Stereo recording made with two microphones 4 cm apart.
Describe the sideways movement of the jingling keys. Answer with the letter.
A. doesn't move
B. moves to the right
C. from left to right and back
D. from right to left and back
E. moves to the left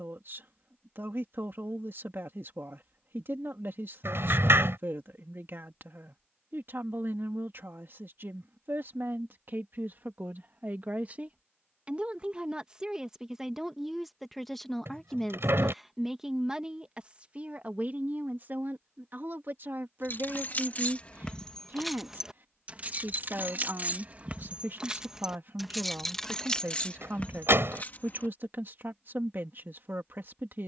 C.